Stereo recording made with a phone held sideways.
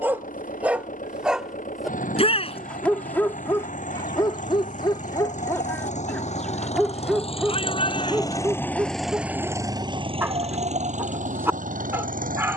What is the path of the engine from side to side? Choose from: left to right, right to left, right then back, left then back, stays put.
left to right.